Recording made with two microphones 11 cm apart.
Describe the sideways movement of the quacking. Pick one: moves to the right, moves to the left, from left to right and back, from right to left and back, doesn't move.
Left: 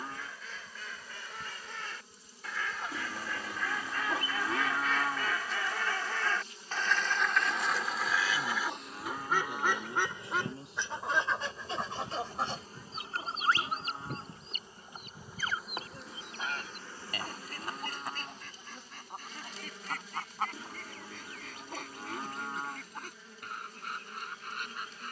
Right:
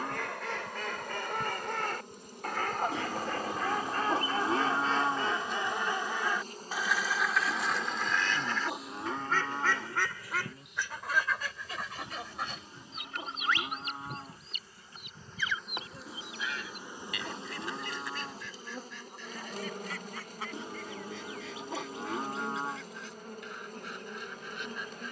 moves to the left.